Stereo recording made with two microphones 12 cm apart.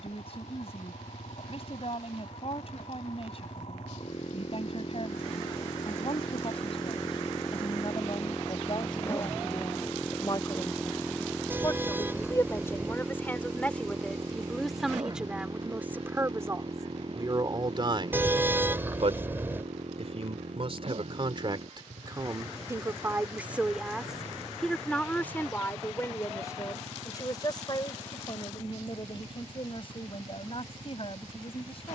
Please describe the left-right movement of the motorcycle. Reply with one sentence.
In this clip you hear the motorcycle go from the left side to the right.